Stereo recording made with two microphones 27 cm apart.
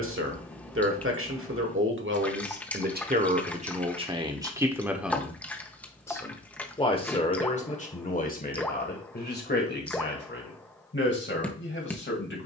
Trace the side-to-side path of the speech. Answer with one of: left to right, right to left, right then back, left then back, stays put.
right to left.